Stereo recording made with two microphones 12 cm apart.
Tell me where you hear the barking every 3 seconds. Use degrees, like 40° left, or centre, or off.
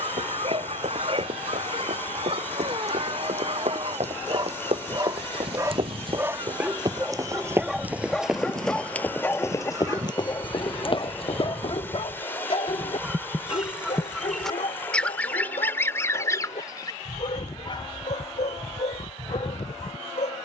50° right, 30° right, centre, 30° left, 60° left, 70° left, 70° left.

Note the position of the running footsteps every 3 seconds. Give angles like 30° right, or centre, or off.
70° right, 60° right, 20° right, 40° left, off, off, off.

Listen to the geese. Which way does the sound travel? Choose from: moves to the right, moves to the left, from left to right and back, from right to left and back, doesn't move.
moves to the left.